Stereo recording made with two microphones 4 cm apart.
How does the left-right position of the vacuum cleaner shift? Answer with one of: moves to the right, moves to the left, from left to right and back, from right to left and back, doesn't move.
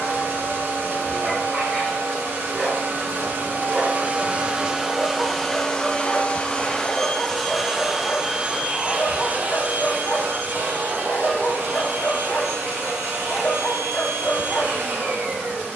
from right to left and back.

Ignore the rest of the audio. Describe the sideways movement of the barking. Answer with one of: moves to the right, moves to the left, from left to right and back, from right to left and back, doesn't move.
moves to the left.